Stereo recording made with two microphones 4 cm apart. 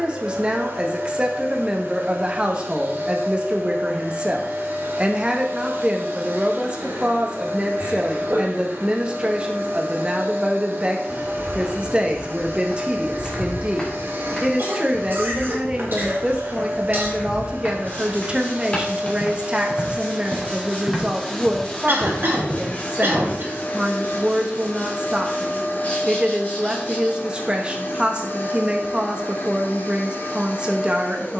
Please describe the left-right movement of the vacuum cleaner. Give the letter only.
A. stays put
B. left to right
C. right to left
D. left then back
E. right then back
C.